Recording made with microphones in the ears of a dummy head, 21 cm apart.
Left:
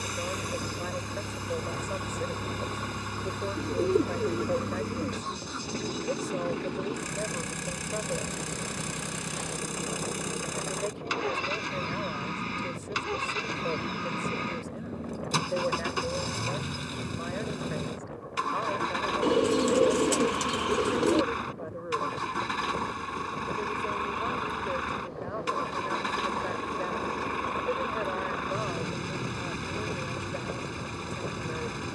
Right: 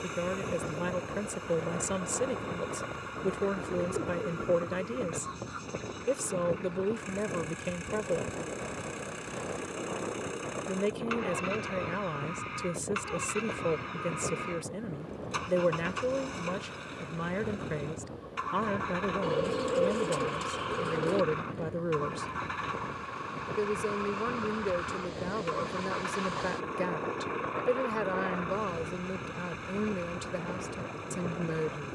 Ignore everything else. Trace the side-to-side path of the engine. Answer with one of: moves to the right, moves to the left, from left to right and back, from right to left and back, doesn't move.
doesn't move.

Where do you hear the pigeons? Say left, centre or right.
left.